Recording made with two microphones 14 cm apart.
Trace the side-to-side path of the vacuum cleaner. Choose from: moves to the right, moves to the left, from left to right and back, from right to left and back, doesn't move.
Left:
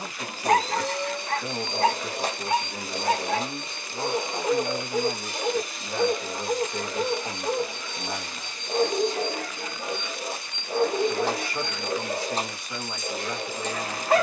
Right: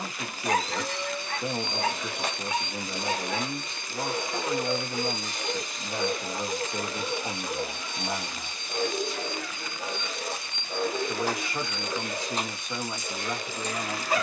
from left to right and back.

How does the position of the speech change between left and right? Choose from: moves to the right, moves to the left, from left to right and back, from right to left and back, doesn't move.
doesn't move.